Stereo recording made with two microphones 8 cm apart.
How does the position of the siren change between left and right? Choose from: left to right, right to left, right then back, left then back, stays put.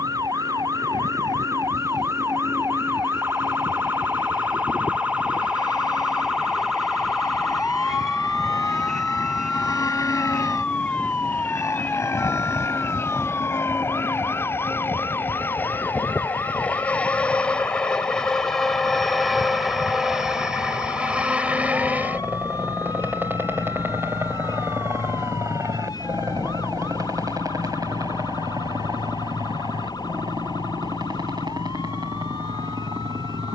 right to left.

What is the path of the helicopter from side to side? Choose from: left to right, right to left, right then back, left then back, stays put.
left to right.